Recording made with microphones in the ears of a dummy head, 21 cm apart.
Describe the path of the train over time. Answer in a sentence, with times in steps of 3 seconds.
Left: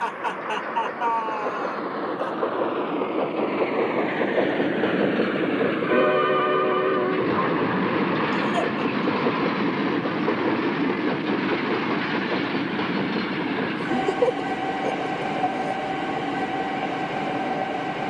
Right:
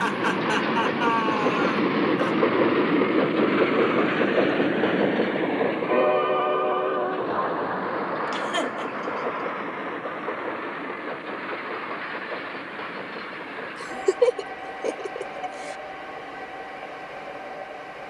You can hear the train on the right from 0 s, in the centre from 3 s and on the left from 6 s.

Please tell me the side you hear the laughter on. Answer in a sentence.
You can hear the laughter on the right.